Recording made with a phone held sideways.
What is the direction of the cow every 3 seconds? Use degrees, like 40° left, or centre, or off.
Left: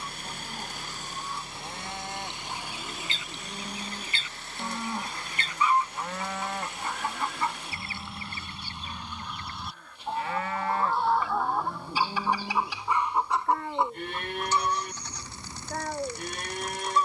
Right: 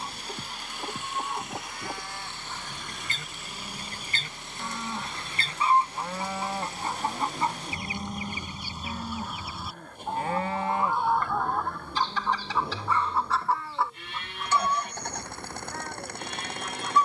40° left, 20° left, 30° right, 20° right, 40° left, 50° left.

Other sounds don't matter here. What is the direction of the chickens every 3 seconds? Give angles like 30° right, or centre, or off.
50° right, 40° right, 20° right, centre, 20° left, 30° left.